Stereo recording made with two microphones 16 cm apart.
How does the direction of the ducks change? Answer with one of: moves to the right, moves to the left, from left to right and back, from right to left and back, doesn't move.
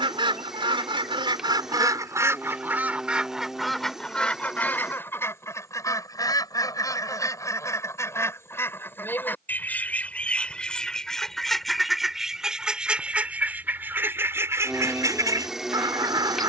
from right to left and back.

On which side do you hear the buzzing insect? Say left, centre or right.
centre.